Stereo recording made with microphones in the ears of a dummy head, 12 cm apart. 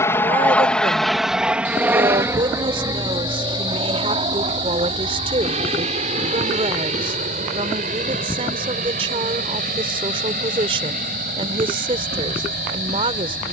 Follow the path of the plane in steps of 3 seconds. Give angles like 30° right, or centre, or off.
centre, 40° right, 50° right, 60° right, 60° right.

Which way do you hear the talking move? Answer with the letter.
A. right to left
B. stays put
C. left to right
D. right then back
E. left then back
B.